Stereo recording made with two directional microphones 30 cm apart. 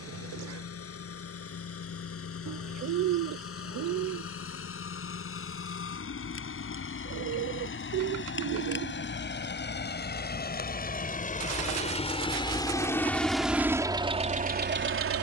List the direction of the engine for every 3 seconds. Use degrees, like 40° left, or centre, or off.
50° left, 50° left, 40° left, 30° left, 10° right.